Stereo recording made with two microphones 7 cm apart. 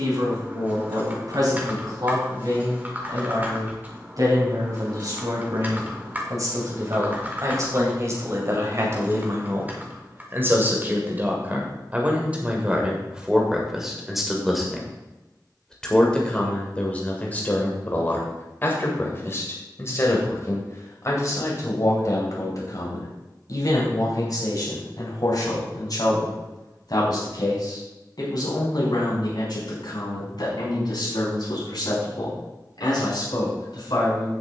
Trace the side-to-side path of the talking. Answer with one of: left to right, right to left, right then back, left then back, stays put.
right to left.